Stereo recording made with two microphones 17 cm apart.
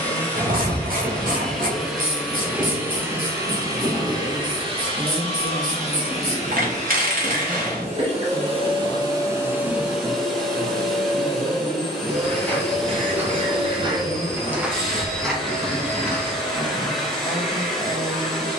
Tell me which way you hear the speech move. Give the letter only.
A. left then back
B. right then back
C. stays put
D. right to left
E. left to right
C.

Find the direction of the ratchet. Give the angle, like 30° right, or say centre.
60° right.